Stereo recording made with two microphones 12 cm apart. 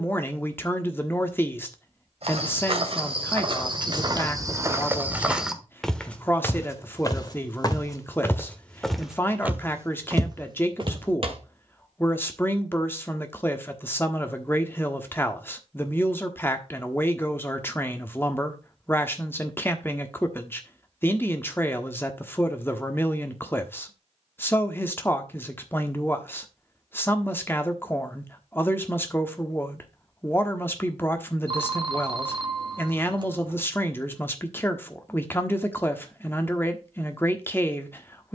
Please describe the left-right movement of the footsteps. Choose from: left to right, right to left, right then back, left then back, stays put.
left then back.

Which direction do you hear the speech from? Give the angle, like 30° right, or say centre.
20° left.